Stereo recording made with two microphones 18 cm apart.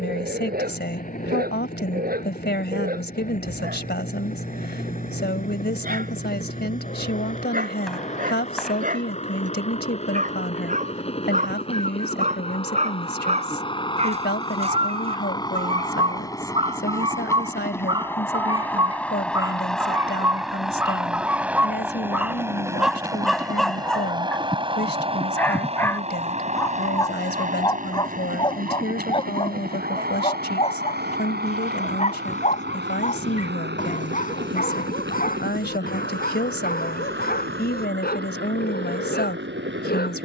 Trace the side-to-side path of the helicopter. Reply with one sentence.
You can hear the helicopter move to the right.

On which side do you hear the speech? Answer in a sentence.
You can hear the speech on the left.